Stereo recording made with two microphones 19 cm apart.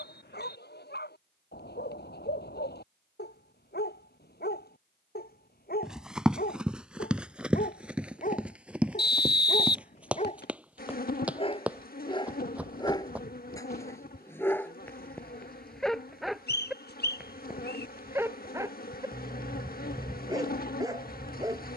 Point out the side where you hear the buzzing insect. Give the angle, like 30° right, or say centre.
50° left.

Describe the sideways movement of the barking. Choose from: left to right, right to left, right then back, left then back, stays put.
left to right.